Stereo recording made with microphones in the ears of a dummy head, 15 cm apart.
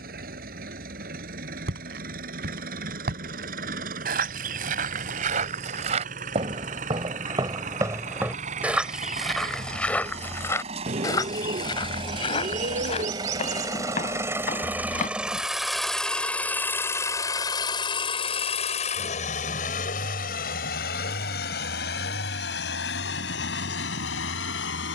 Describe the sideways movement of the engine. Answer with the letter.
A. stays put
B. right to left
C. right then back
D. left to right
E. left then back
B.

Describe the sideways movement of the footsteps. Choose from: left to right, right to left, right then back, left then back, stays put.
right to left.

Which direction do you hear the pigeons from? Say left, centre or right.
right.